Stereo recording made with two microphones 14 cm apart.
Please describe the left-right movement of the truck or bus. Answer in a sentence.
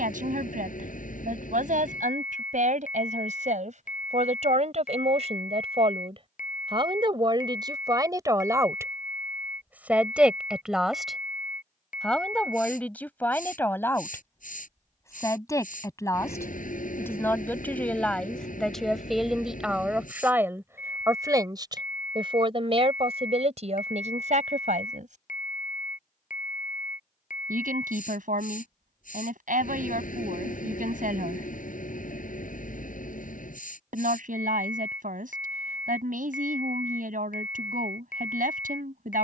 You can hear the truck or bus stay in one place.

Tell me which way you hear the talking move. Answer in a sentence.
You can hear the talking go left and come back.